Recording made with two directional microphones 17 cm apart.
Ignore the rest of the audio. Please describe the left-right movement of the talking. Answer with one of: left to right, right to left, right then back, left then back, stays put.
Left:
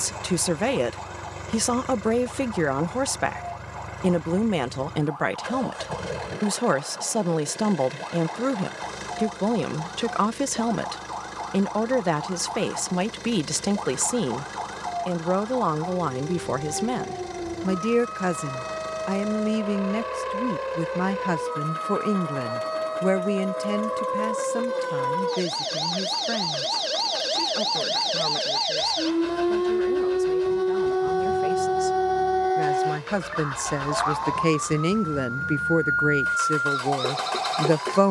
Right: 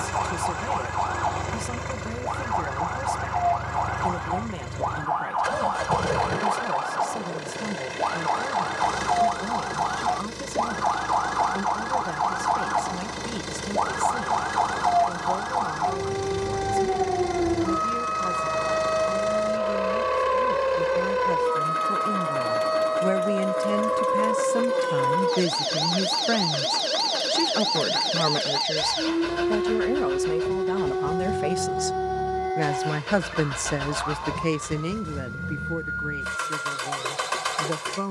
right then back.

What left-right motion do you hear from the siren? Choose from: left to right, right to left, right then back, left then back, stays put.
right to left.